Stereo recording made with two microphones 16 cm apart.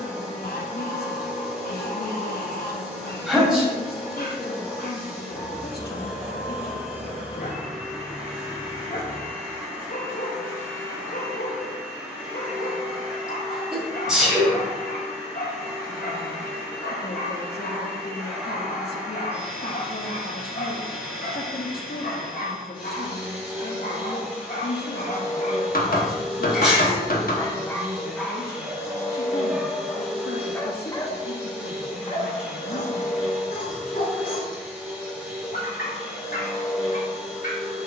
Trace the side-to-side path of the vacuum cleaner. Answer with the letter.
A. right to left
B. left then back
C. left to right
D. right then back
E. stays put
E.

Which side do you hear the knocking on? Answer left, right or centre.
left.